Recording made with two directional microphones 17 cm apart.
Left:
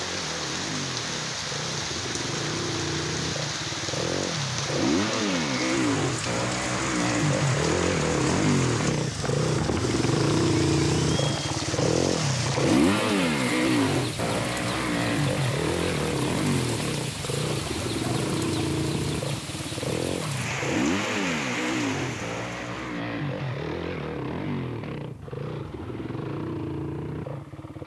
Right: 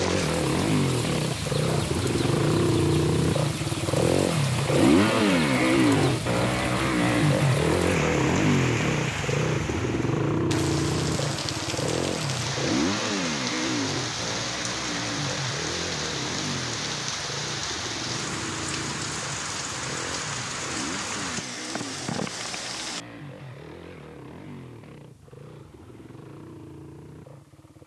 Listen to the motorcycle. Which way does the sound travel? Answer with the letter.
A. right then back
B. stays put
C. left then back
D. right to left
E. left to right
D.